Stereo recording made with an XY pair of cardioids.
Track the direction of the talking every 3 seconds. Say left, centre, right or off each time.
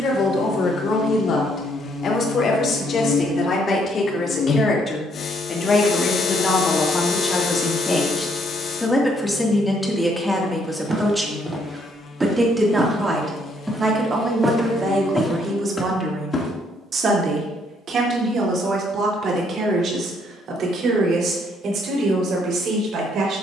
left, left, left, centre, right, right, right, right.